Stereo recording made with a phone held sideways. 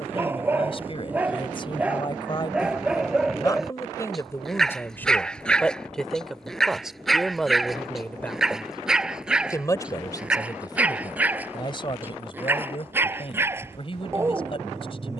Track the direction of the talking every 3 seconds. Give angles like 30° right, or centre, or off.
40° left, 20° left, centre, 30° left, 40° left.